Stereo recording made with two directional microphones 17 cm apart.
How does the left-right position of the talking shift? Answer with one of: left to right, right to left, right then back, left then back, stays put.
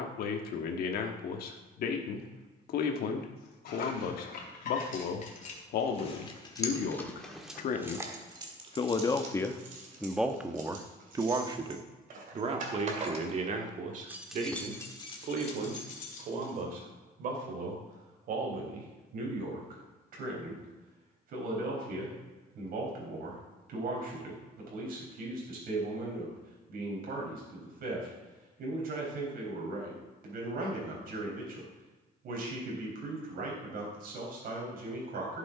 left to right.